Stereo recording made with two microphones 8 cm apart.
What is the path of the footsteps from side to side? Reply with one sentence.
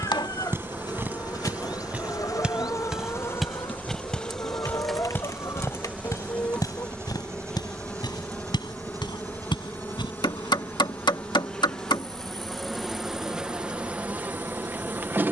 You can hear the footsteps go from the right side to the left.